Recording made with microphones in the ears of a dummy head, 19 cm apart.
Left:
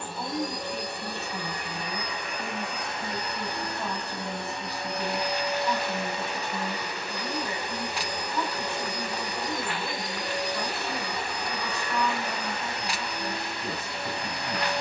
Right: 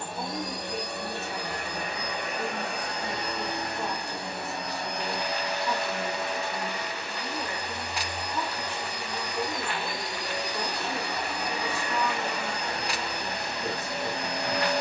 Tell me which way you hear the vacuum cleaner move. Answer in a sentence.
In this clip you hear the vacuum cleaner go left and come back.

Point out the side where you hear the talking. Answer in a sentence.
In this clip you hear the talking on the right.